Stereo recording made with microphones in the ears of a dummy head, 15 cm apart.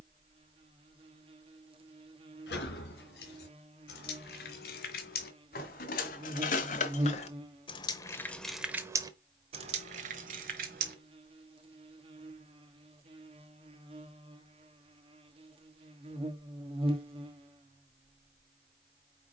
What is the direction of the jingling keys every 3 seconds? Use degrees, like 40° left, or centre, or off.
80° left, 70° left, 30° left, 50° right, off, off, off.